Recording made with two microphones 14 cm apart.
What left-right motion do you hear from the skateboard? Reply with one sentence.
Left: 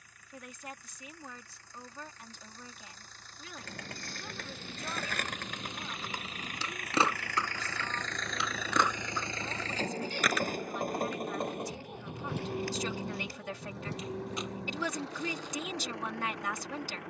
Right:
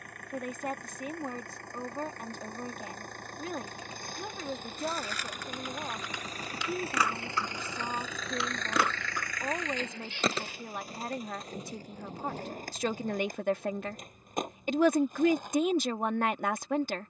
You can hear the skateboard go from the left side to the right.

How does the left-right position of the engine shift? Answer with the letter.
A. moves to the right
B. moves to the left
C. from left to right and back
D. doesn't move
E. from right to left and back
B.